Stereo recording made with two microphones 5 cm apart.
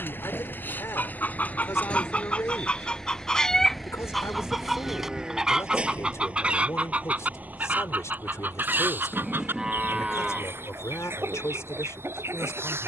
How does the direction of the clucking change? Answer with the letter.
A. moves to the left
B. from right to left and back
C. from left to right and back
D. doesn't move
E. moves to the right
E.